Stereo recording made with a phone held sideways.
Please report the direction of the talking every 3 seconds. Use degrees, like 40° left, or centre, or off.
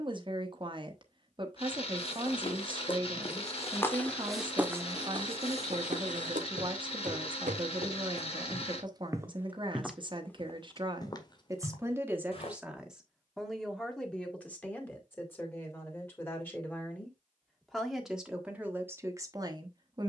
30° right, 30° right, 30° right, 30° right, centre, 10° left, 20° right.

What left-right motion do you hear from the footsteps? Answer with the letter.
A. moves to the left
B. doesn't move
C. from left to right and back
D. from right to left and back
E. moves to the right
C.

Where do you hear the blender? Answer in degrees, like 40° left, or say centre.
40° left.